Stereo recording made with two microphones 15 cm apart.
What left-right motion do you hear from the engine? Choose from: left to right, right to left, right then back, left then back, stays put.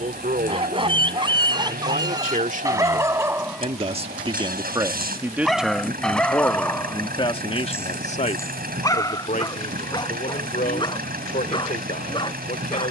stays put.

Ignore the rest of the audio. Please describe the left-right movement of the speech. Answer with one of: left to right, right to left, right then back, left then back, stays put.
right to left.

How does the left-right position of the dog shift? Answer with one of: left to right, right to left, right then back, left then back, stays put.
right to left.